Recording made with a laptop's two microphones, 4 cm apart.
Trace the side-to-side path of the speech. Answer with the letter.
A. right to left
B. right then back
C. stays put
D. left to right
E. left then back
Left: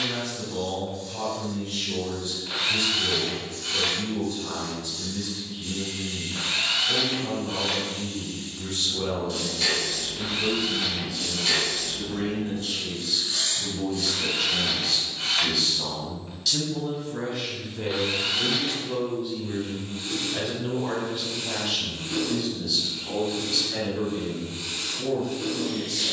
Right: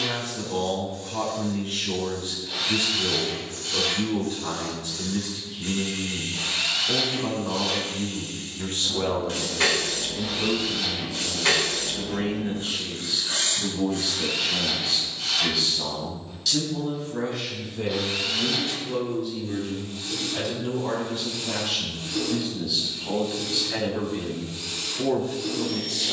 E.